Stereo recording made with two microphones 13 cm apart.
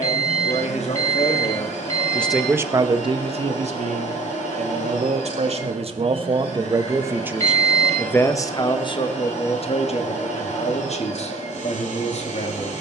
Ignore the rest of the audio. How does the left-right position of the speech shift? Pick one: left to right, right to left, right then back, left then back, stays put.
right then back.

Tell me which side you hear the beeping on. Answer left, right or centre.
left.